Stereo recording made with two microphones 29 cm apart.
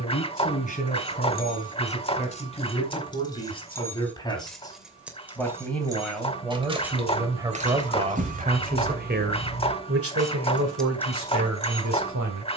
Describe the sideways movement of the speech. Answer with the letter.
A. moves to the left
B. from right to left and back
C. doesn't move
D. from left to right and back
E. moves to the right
E.